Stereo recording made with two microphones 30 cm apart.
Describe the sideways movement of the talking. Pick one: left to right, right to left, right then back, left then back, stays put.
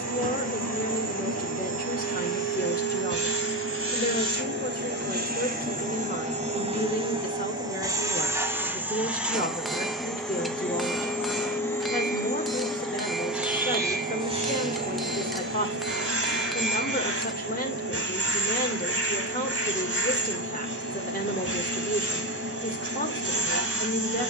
stays put.